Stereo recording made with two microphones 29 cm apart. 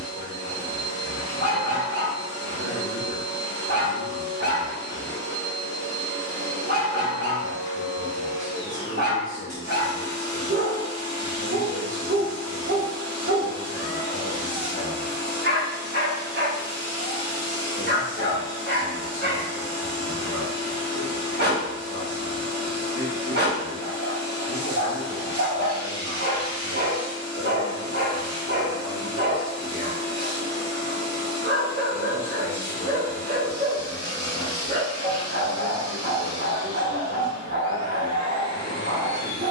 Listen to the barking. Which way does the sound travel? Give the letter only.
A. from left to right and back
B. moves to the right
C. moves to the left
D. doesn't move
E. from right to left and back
D.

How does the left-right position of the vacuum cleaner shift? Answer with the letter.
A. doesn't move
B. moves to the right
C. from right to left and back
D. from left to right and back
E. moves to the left
A.